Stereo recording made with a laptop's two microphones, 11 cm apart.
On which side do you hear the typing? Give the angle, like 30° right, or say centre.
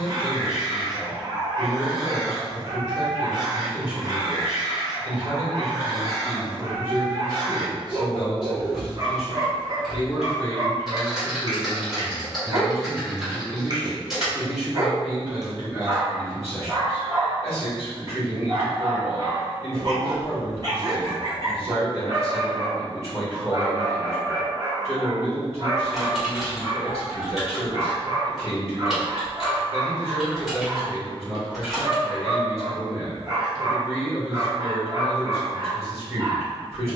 centre.